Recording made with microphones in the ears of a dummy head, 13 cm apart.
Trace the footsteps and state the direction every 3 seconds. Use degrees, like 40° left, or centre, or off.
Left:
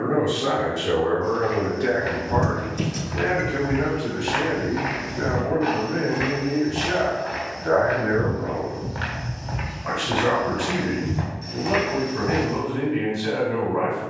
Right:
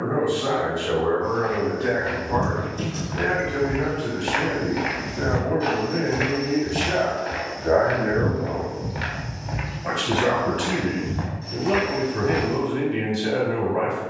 20° left, 20° right, 40° right, 10° left, 30° left.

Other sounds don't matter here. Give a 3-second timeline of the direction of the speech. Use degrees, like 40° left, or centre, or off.
20° left, centre, 20° right, 40° right, 40° right.